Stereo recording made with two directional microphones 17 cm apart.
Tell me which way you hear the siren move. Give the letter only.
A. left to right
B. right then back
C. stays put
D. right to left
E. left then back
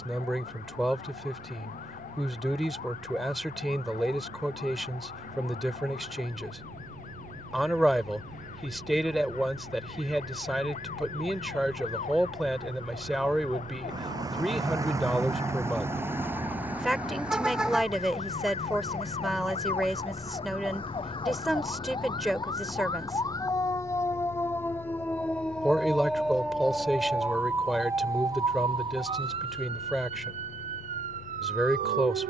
A.